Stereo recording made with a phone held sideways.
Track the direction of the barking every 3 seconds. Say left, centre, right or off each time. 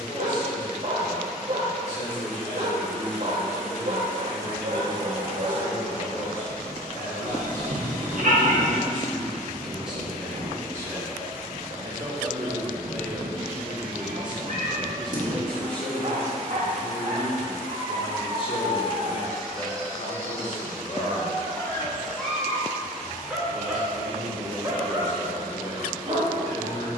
right, right, right, right, right, right, centre, centre, right.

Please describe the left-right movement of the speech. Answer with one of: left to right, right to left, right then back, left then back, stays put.
right then back.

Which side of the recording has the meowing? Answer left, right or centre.
right.